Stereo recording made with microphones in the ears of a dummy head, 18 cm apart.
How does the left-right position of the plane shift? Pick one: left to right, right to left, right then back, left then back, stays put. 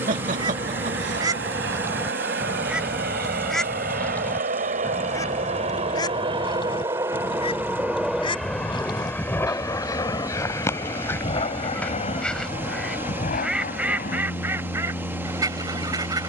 right to left.